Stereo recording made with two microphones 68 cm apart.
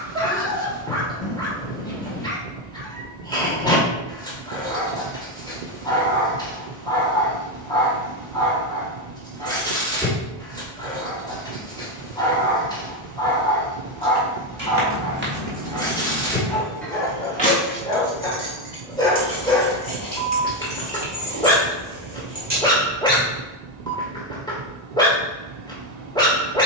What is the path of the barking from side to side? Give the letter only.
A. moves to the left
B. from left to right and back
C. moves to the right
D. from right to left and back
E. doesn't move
E.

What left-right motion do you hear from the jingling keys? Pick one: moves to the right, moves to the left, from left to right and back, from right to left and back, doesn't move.
from right to left and back.